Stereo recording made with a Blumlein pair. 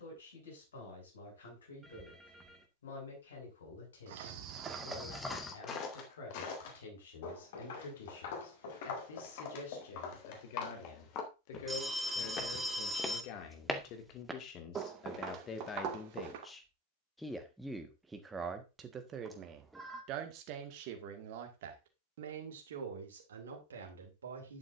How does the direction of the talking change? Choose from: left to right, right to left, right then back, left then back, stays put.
left to right.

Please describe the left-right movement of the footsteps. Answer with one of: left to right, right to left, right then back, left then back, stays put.
left then back.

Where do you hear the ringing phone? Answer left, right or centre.
centre.